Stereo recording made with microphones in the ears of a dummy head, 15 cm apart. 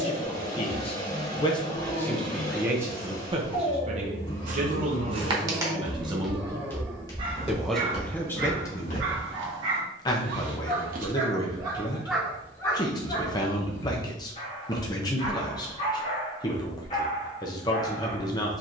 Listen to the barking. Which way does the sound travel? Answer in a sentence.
In this clip you hear the barking go right and come back.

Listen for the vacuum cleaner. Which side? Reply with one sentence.
In this clip you hear the vacuum cleaner on the left.